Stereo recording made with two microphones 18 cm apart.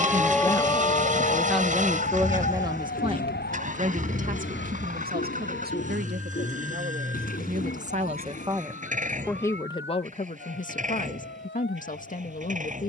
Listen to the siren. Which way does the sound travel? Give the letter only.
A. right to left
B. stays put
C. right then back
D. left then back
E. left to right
A.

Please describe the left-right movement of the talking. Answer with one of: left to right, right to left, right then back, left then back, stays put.
right then back.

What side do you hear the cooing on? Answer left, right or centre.
left.